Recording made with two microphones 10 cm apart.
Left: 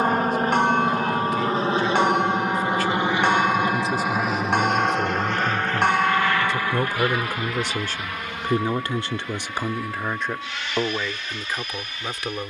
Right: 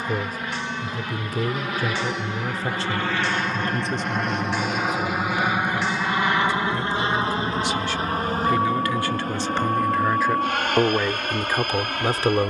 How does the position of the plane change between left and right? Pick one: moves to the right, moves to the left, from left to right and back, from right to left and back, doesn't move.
moves to the right.